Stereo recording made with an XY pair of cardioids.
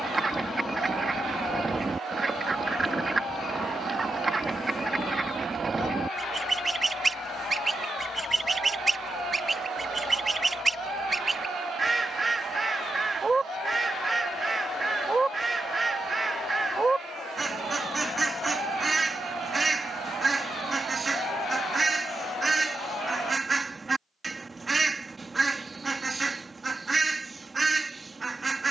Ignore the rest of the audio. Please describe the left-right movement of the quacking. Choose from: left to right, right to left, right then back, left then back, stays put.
stays put.